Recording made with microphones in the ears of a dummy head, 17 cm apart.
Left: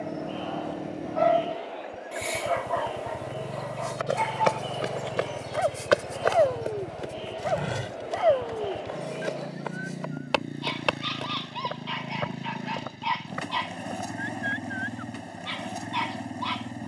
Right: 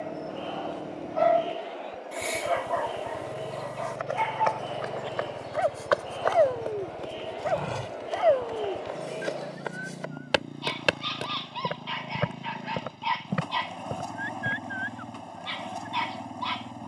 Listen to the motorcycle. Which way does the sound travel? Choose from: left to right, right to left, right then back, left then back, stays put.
stays put.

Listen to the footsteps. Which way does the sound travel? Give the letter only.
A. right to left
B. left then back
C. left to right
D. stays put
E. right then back
C.